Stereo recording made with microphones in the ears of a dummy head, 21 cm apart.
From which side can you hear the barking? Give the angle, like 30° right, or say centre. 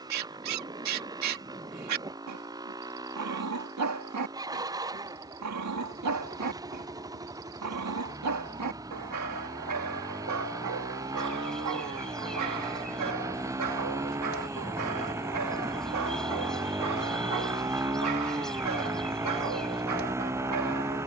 80° right.